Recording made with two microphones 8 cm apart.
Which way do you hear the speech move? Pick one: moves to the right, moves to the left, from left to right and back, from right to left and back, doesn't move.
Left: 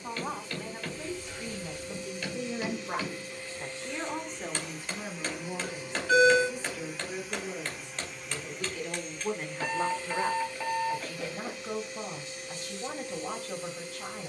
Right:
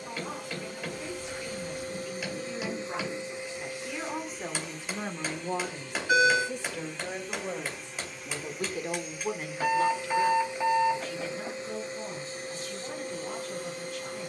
from left to right and back.